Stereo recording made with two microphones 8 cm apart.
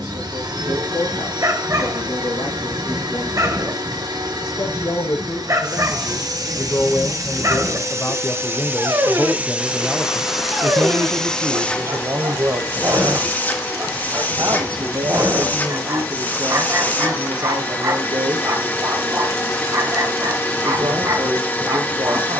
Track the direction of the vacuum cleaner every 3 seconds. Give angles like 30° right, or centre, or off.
60° right, 60° right, 40° right, centre, 20° left, 20° left, 20° left, 20° left.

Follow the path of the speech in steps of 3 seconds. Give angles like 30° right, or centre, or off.
60° left, 50° left, 30° left, 20° right, 50° right, 60° right, 60° right, 60° right.